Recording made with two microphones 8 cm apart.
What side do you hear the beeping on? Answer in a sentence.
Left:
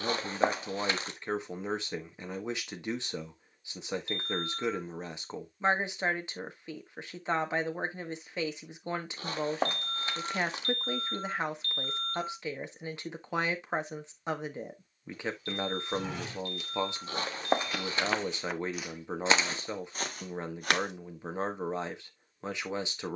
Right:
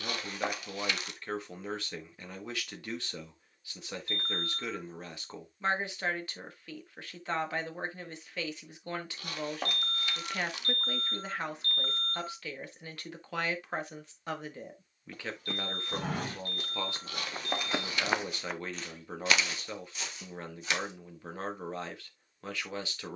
In this clip you hear the beeping on the right.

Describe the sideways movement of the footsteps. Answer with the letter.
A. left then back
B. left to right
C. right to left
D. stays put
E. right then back
C.